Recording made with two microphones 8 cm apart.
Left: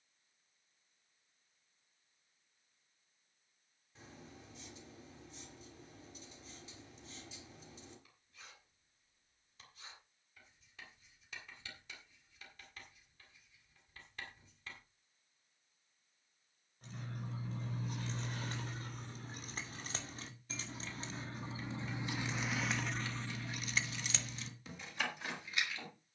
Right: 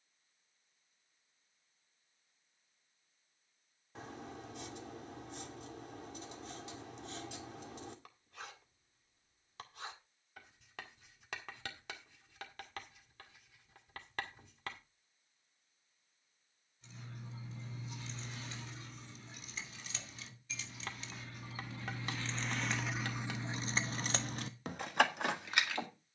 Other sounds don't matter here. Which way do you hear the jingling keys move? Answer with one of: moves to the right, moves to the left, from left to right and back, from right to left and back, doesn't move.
moves to the right.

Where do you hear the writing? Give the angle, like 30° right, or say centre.
70° right.